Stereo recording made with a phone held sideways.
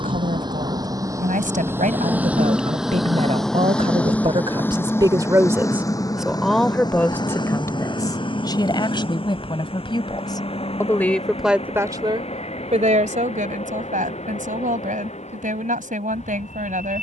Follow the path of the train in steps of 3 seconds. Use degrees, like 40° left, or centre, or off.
20° right, 10° left, 30° left, 40° left, 50° left, 50° left.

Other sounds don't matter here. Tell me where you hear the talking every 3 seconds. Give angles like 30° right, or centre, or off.
70° right, 40° right, 20° left, 20° left, 70° right, 80° right.